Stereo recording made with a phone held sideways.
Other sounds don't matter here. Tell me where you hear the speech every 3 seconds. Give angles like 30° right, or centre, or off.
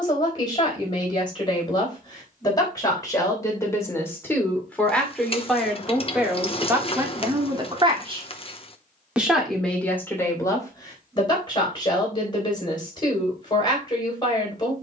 30° left, 10° left, 20° right, 20° left, 30° left.